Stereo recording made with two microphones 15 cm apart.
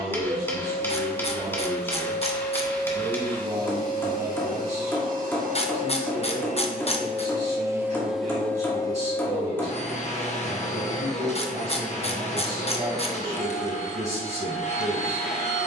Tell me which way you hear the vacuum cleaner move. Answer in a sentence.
In this clip you hear the vacuum cleaner move from right to left.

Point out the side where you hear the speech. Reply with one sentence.
You can hear the speech on the right.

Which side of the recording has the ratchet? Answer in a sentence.
You can hear the ratchet on the left.